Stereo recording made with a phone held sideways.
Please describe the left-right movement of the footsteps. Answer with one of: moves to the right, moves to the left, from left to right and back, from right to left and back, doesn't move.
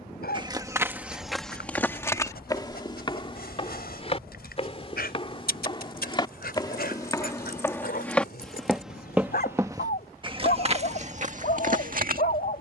from right to left and back.